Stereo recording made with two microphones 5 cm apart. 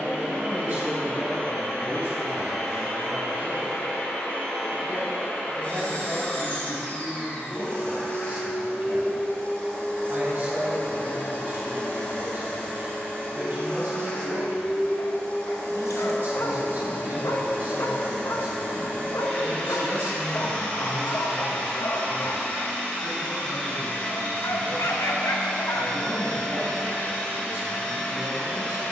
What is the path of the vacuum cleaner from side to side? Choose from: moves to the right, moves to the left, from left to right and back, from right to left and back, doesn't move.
doesn't move.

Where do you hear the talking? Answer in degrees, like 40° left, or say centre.
50° right.